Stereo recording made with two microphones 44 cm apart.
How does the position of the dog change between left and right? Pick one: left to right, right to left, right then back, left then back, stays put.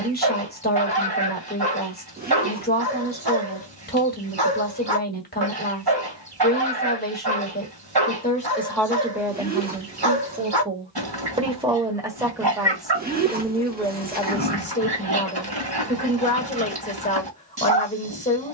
stays put.